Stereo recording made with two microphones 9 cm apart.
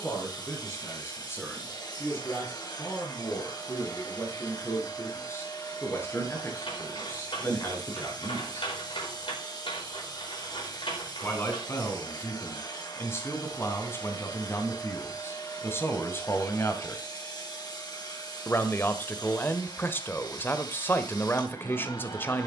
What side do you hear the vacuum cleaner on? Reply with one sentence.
You can hear the vacuum cleaner on the left.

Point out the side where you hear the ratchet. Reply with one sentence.
In this clip you hear the ratchet on the left.